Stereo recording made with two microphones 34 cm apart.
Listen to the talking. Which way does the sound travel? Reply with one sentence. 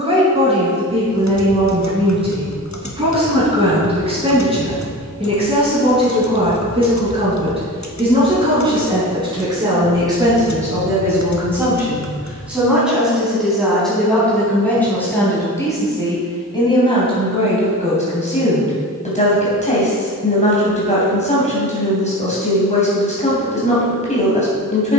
You can hear the talking move from right to left.